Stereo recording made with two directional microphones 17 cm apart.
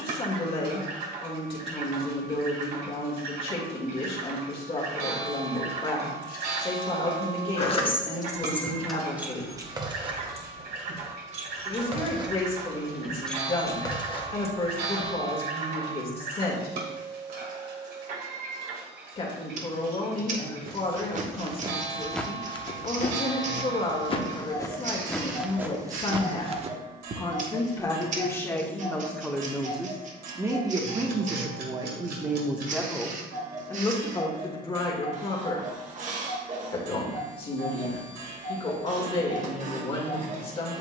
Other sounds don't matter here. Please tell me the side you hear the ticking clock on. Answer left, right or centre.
right.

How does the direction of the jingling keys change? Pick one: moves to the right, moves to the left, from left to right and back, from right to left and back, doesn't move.
from left to right and back.